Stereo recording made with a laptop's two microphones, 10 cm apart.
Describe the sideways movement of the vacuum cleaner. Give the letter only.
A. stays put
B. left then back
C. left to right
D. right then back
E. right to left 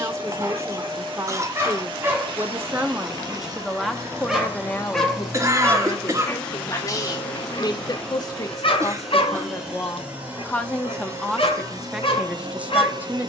B.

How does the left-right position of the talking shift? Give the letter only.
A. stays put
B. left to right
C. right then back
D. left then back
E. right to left
D.